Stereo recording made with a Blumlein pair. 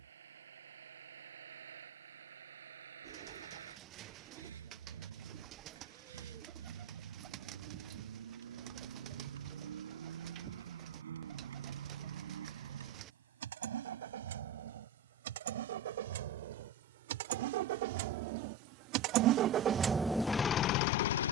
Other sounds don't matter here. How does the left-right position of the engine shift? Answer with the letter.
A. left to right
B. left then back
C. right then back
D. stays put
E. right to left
E.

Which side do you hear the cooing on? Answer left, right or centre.
right.